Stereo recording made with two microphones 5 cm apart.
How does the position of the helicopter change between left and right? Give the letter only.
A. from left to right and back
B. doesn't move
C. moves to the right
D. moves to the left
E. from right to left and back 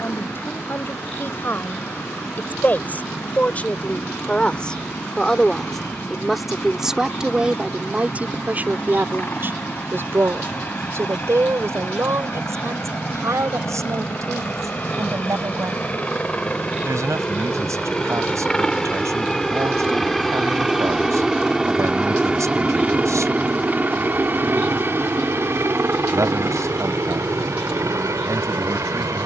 C.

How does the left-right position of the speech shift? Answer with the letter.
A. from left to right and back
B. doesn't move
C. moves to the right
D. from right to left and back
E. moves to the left
C.